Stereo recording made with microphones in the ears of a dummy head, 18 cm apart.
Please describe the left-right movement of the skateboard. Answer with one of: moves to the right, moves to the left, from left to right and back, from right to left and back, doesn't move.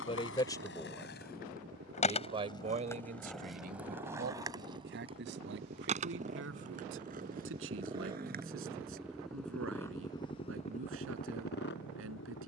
moves to the right.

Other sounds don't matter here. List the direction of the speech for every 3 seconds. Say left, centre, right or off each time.
centre, right, right, right.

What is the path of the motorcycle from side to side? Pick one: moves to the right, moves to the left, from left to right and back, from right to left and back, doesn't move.
moves to the left.